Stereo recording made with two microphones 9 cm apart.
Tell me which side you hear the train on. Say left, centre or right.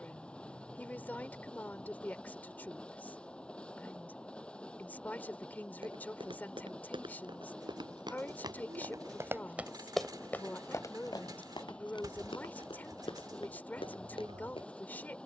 centre.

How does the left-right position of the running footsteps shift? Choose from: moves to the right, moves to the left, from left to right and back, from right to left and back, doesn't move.
moves to the left.